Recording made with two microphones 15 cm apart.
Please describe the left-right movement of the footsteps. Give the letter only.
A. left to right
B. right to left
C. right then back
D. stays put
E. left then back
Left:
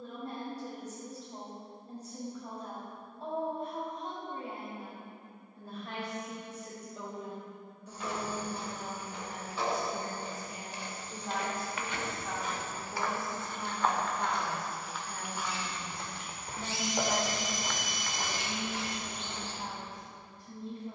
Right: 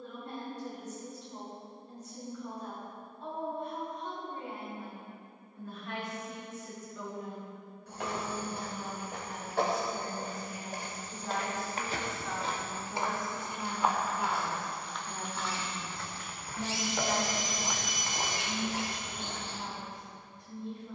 E.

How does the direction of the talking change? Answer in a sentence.
You can hear the talking move from left to right and back again.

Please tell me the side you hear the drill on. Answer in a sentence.
You can hear the drill on the right.